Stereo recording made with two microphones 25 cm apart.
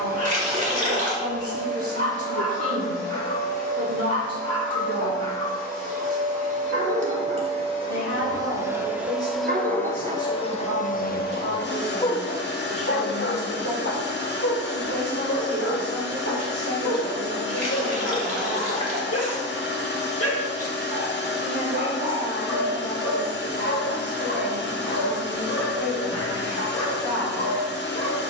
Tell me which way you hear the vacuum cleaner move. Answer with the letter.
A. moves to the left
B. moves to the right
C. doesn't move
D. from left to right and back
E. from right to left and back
A.